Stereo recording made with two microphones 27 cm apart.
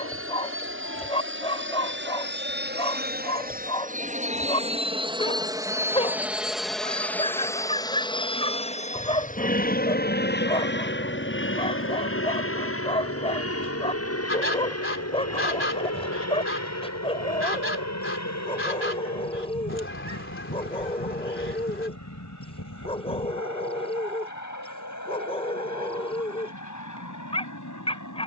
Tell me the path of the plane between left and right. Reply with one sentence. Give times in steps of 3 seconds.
You can hear the plane on the right from 0 s, in the centre from 6 s and on the left from 9 s.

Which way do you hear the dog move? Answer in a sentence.
You can hear the dog stay put.